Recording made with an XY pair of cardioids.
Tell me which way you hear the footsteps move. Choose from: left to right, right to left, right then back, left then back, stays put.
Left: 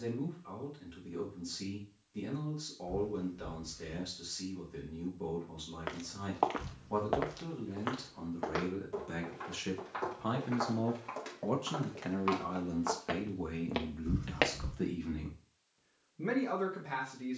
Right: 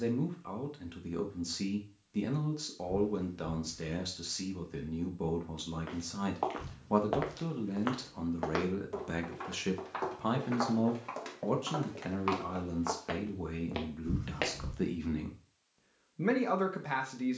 right then back.